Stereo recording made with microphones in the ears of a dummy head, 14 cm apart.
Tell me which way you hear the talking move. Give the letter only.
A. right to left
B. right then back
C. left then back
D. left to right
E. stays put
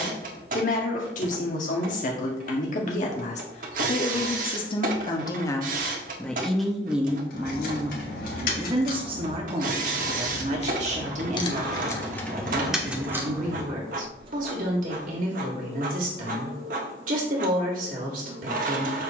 D.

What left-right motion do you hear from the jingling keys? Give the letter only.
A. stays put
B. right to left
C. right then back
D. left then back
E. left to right
E.